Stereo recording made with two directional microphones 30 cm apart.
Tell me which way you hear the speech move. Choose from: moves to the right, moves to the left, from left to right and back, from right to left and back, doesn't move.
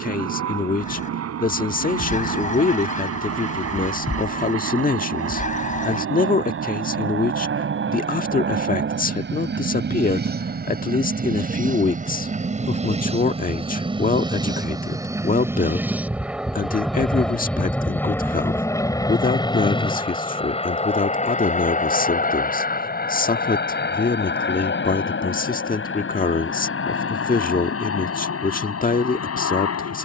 doesn't move.